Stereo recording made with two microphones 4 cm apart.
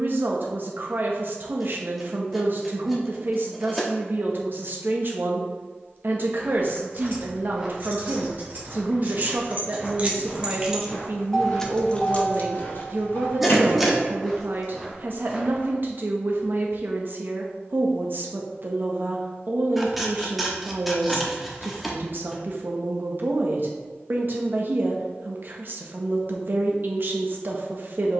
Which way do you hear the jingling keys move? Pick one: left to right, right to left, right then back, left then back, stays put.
right to left.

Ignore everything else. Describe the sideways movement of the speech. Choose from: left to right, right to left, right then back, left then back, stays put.
stays put.